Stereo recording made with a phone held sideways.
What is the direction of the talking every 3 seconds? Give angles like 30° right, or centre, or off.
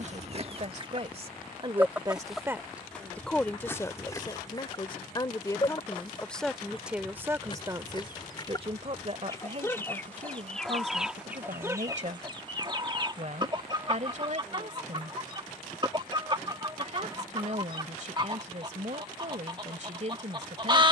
40° right, 20° left, 20° right, 50° right, 50° right, 50° right, 50° right.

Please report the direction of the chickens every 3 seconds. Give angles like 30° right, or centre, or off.
20° right, 20° left, 30° left, centre, 30° right, 30° right, 30° right.